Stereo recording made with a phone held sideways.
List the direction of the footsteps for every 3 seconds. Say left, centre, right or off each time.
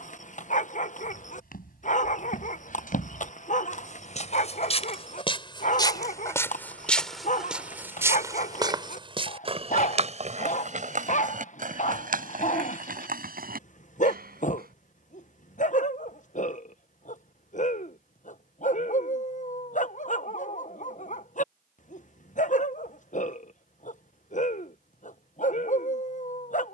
left, left, centre, right, right, off, off, off, off.